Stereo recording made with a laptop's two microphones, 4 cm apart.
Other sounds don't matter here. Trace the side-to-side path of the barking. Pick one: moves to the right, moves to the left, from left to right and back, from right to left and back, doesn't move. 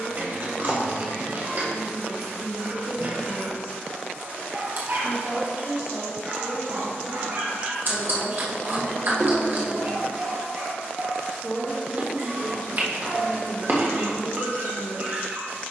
doesn't move.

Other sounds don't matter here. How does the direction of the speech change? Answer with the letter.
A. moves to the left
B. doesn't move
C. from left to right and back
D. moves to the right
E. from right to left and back
A.